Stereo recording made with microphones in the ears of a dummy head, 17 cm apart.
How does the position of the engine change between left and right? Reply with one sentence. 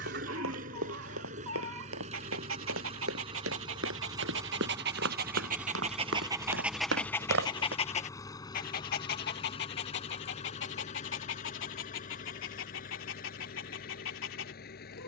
You can hear the engine move to the left.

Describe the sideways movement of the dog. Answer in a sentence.
You can hear the dog move to the left.